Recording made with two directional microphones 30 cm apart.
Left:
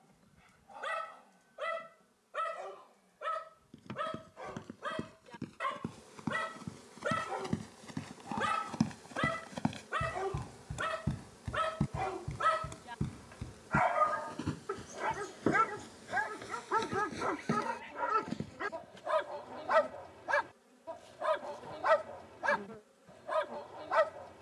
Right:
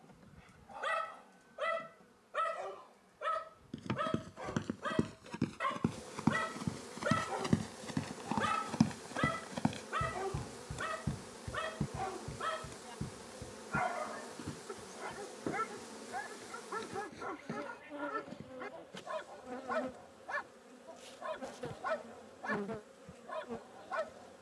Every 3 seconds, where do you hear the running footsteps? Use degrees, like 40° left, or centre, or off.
off, 60° right, 40° right, 10° left, 50° left, 60° left, 70° left, off.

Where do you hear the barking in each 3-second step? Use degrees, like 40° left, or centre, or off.
10° right, 10° right, centre, 20° left, 40° left, 60° left, 60° left, 60° left.